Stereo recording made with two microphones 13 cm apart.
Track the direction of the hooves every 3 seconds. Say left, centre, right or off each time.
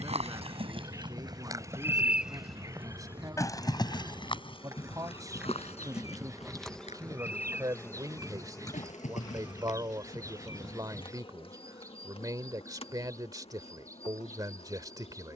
right, left, left, left, off.